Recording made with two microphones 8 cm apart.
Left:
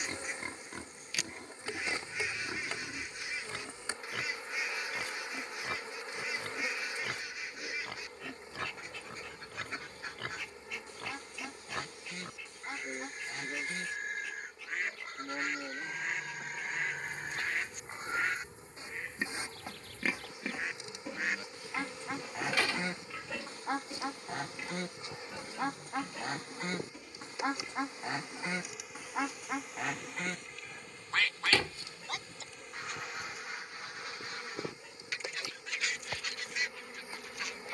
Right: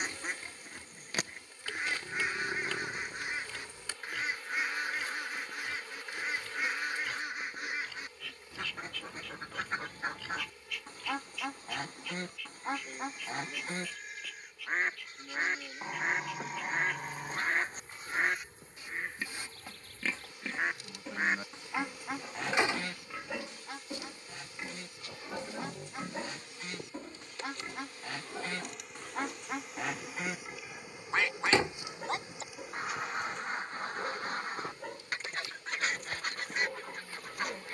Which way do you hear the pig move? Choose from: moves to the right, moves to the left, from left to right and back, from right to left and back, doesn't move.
moves to the right.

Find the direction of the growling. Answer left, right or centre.
right.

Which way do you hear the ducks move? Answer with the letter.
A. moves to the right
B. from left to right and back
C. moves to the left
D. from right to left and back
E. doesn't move
D.